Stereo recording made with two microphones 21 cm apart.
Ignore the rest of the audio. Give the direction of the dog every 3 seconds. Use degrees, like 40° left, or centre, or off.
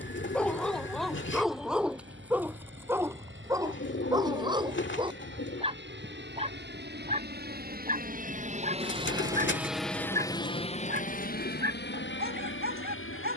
centre, 20° right, 30° right, 40° right, 50° right.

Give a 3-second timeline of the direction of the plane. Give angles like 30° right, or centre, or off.
80° right, 70° right, 50° right, 20° left, 60° left.